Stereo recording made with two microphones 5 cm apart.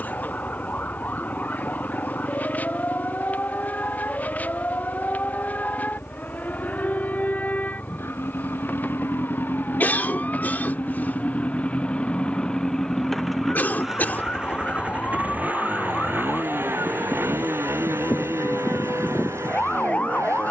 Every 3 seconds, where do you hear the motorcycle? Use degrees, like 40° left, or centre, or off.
60° left, 60° left, 50° left, 30° left, centre, 50° right, 70° right.